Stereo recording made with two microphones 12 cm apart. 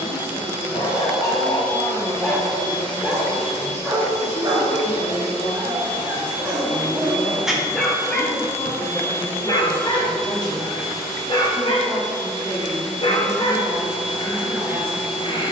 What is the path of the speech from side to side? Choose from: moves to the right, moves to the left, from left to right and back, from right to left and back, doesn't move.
moves to the right.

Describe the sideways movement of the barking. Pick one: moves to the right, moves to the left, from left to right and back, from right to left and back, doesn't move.
from left to right and back.